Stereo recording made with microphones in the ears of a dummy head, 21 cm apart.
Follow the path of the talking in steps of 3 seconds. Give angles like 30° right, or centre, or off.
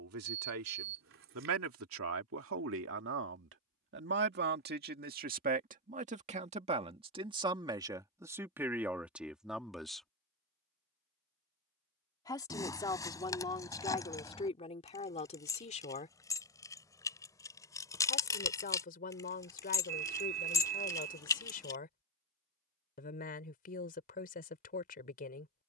60° right, 40° right, 20° right, centre, 20° left, 30° left, 40° left, 40° left, 40° left.